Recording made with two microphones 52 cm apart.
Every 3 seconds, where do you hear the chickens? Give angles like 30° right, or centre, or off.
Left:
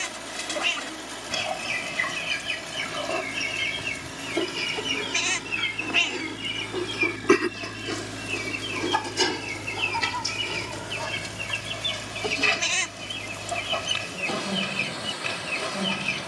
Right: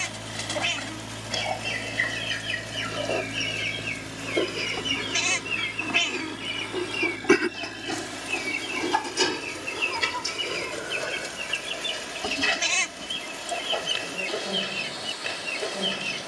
30° left, 20° left, centre, 10° left, 30° left, 30° left.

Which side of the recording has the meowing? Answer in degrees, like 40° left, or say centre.
20° right.